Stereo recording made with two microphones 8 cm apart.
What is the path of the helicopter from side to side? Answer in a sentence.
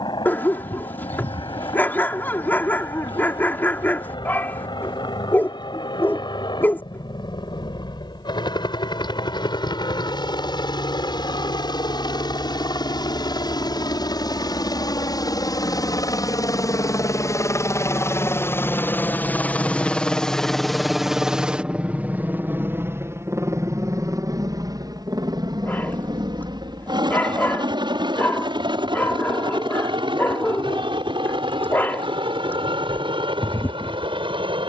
You can hear the helicopter travel towards the right.